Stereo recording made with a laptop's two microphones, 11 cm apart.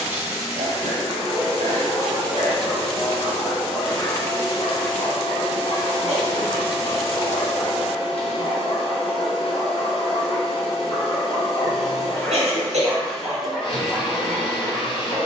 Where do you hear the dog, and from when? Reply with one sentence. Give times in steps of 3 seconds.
In this clip you hear the dog in the centre from 0 s, on the left from 3 s and in the centre from 12 s.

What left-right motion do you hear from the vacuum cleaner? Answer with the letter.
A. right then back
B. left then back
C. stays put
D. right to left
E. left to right
C.